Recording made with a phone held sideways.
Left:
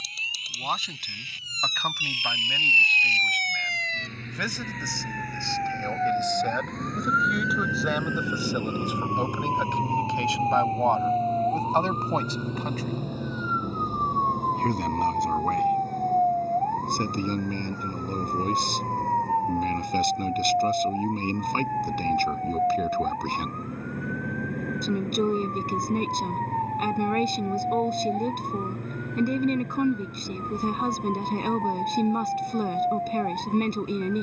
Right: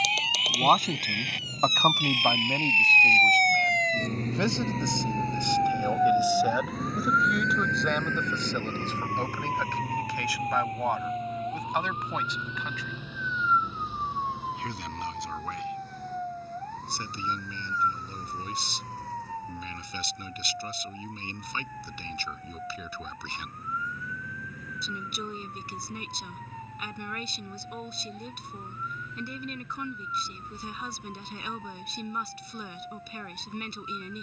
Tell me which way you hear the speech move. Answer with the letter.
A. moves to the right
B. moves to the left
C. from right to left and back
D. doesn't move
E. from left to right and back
B.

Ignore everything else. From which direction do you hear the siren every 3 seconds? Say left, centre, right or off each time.
right, right, centre, left, left, left, left, left, left, left, left, left.